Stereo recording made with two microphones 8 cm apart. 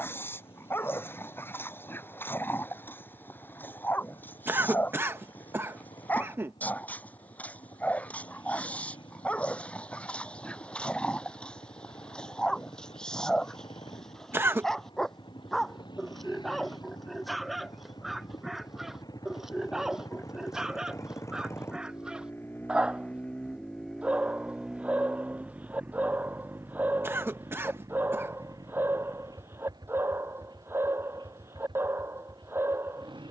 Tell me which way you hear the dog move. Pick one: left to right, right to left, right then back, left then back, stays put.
left to right.